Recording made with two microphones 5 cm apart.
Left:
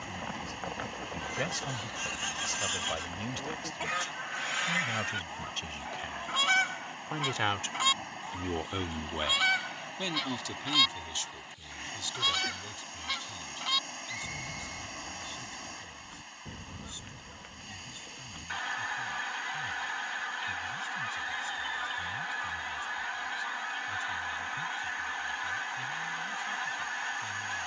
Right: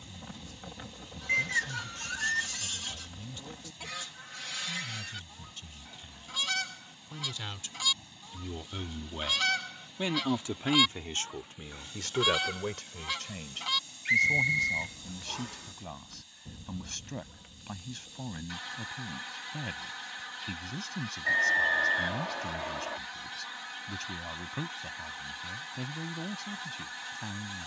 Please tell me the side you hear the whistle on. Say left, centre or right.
right.